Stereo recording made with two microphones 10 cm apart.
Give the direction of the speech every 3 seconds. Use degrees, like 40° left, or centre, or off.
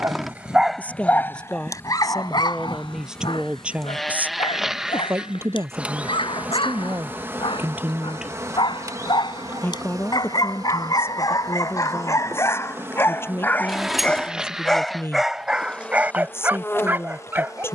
10° left, 20° right, 20° right, 20° left, 20° left, 20° left.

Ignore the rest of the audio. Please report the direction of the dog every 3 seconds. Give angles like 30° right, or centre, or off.
30° left, 60° left, 60° left, 50° left, 20° left, 10° right.